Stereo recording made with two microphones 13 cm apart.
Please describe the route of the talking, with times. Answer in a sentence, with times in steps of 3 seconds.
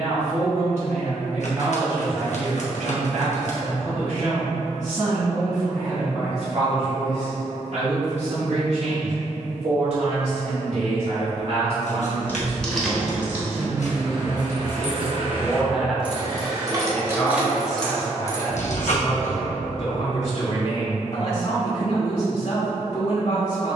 In this clip you hear the talking on the right from 0 s, in the centre from 15 s and on the left from 18 s.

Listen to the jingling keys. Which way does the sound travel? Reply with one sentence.
In this clip you hear the jingling keys go right and come back.